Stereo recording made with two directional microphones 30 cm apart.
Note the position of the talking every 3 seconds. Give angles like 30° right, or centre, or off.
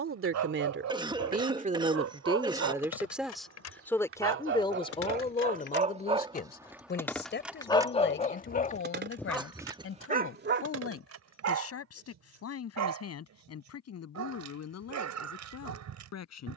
30° right, 10° left, 40° left, 50° left, 50° left, 60° left.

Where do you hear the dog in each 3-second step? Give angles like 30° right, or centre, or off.
60° right, 30° right, 10° left, 30° right, 60° right, 60° right.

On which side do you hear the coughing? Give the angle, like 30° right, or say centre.
10° right.